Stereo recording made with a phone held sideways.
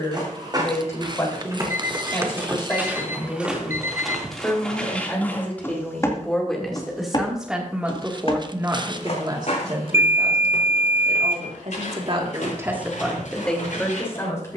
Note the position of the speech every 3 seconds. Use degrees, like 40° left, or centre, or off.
20° left, 20° left, 10° right, 50° right, centre.